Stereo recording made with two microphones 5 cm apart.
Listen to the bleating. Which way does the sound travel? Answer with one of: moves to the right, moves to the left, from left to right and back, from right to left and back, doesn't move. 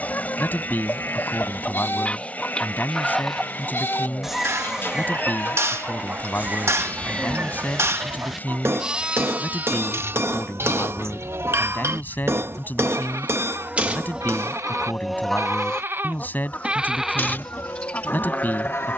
from left to right and back.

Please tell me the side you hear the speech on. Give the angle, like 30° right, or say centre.
30° left.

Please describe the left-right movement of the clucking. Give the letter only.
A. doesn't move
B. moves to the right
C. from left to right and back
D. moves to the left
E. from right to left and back
C.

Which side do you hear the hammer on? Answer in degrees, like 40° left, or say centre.
50° right.